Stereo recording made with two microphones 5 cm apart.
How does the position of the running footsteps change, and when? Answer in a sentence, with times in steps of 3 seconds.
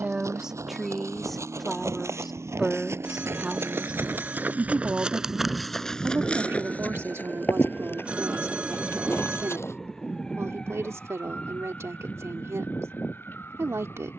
In this clip you hear the running footsteps on the right from 0 s, on the left from 6 s and not at all from 12 s.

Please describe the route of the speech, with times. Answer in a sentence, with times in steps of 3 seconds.
In this clip you hear the speech in the centre from 0 s and on the right from 3 s.